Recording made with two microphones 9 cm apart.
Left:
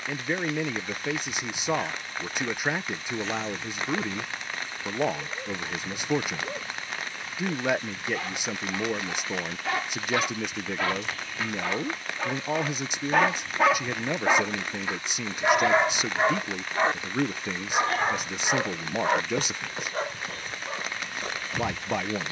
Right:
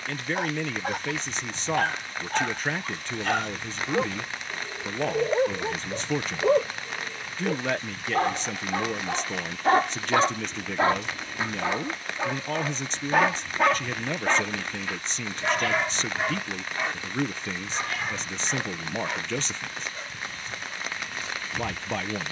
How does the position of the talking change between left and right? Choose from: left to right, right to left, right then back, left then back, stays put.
stays put.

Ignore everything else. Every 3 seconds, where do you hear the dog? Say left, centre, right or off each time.
right, right, right, right, centre, left, left, left.